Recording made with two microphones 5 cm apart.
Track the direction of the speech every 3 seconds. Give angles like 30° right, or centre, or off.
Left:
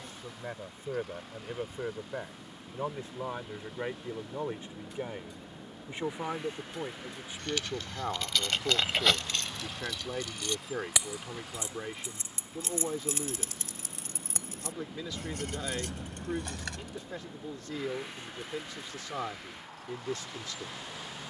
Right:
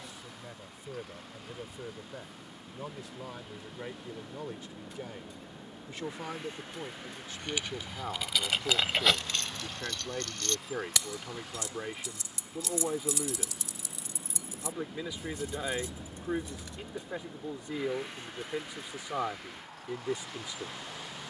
40° left, 30° left, 20° left, centre, 10° right, 20° right, 20° right.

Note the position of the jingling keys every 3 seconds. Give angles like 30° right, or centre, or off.
off, off, 10° right, 10° left, 40° left, 60° left, off.